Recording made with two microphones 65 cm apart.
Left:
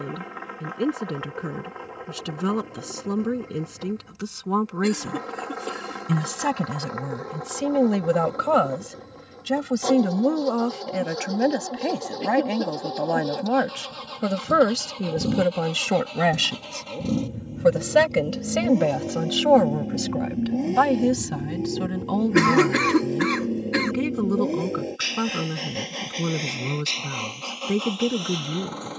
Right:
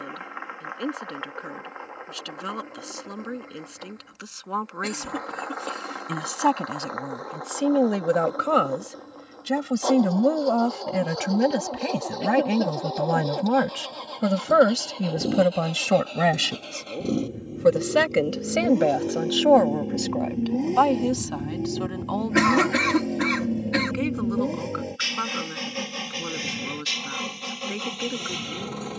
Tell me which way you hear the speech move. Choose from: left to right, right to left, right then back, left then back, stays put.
right then back.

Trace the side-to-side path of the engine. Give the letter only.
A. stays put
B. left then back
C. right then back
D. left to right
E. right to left
D.